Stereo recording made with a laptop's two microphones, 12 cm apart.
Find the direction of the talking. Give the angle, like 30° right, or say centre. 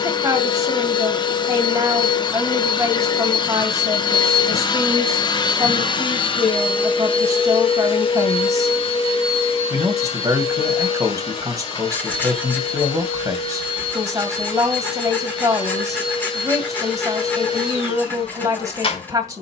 30° right.